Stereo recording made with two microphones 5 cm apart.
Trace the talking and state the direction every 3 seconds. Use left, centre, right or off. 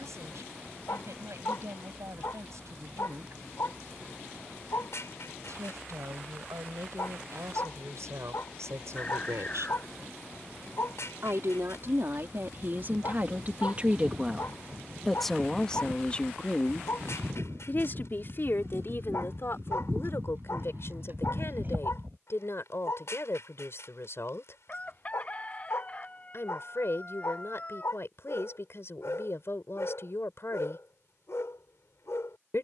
right, right, right, right, right, left, left, left, left, left, left.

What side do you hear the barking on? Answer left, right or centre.
left.